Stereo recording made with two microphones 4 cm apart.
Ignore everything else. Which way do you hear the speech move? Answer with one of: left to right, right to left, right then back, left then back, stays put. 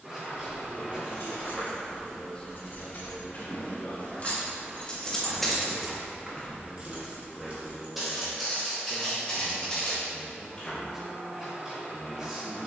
left then back.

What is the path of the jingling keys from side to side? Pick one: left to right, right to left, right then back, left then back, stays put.
left to right.